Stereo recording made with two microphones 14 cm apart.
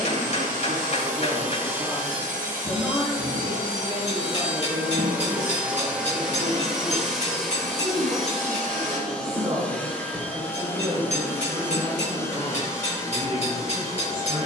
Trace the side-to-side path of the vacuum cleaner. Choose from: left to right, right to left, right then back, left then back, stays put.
right to left.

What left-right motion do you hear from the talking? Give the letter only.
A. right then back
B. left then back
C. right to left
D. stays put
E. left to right
E.